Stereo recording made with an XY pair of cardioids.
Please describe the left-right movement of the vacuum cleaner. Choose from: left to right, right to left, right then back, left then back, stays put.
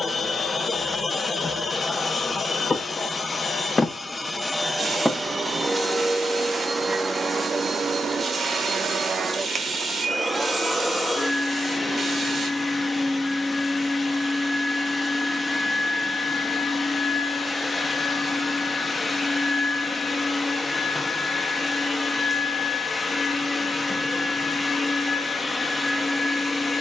right then back.